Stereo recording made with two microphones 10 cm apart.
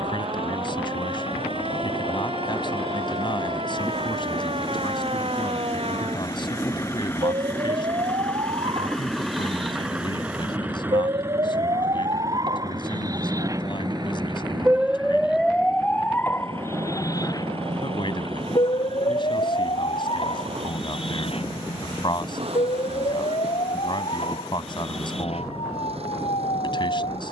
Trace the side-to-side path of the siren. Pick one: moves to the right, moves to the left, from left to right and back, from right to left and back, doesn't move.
moves to the left.